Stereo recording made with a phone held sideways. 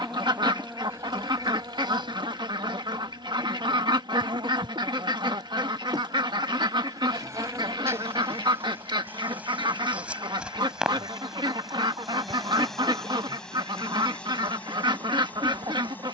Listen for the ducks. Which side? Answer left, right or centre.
right.